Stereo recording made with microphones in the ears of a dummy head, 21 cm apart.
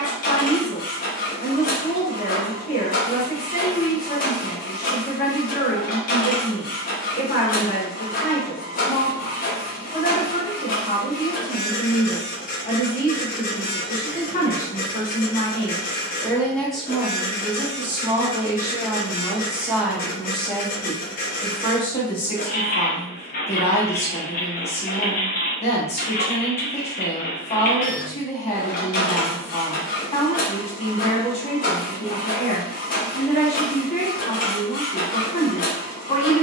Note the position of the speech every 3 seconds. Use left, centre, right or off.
left, left, left, left, left, centre, centre, left, left, left, left, left.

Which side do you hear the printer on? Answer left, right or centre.
left.